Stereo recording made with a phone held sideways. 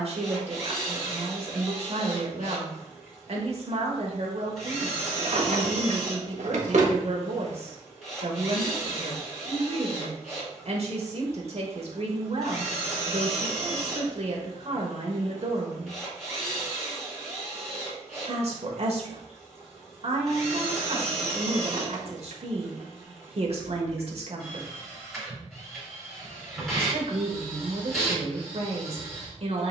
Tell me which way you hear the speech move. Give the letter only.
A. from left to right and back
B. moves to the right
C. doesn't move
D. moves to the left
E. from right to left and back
C.